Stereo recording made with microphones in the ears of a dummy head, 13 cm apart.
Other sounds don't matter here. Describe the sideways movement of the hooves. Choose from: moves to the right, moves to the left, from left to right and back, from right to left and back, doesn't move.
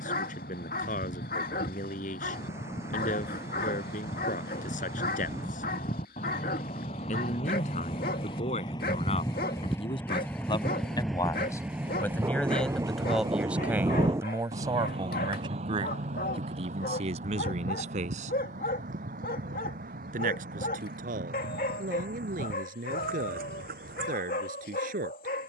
moves to the right.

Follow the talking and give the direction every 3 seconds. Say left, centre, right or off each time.
left, left, left, left, centre, right, right, right, right.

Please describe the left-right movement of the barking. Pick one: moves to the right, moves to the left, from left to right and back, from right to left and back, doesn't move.
doesn't move.